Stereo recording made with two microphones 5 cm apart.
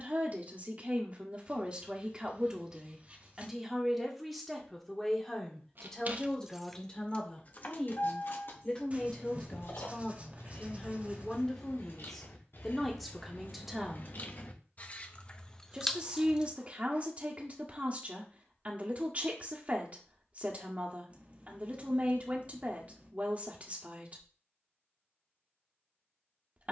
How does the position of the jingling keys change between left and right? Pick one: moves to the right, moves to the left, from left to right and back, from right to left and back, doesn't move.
from right to left and back.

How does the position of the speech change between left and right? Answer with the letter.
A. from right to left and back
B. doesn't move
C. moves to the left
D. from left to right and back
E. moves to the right
A.